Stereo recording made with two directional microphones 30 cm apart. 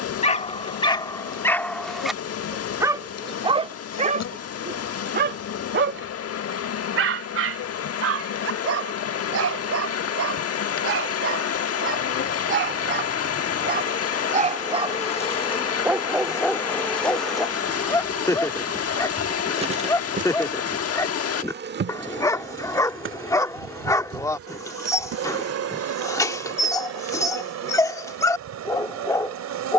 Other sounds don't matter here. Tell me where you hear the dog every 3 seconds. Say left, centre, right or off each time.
centre, right, right, right, right, centre, centre, centre, centre, centre.